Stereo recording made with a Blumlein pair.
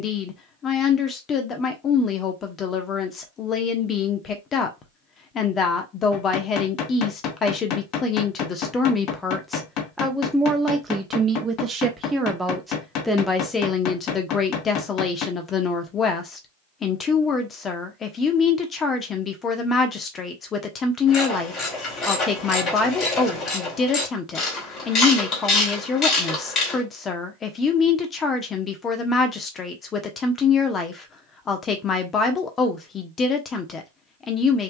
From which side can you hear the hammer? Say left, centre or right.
left.